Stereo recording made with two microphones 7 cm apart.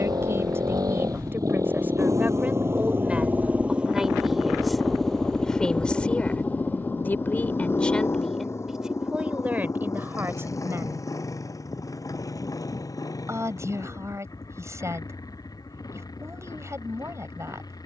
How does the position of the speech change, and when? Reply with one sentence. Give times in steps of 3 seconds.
You can hear the speech on the right from 0 s, in the centre from 3 s and on the right from 9 s.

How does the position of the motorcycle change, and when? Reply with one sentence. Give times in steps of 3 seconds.
In this clip you hear the motorcycle on the right from 0 s, in the centre from 3 s and on the left from 6 s.